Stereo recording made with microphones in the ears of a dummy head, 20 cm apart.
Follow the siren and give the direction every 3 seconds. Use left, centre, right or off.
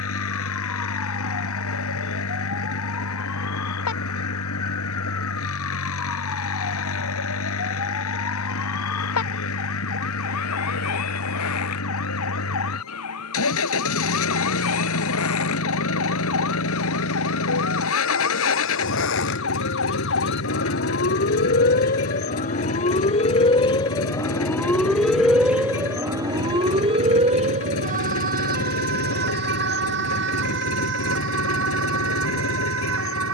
left, left, left, left, left, left, left, left, centre, right, right.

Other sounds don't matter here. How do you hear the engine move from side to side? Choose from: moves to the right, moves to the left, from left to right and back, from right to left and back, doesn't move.
doesn't move.